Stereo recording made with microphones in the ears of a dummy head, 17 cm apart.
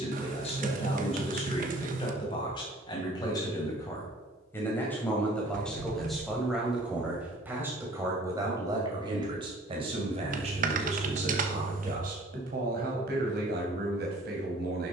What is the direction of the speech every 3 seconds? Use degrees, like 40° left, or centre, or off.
30° left, 10° left, 10° right, 30° right, 50° right.